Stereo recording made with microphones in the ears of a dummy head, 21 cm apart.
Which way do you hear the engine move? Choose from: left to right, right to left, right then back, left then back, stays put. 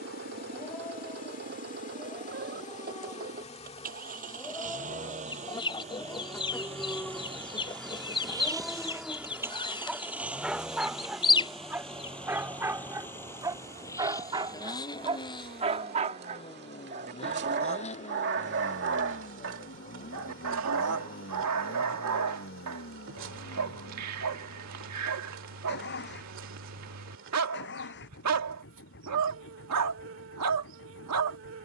right to left.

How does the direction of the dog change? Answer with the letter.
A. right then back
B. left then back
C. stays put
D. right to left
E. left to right
E.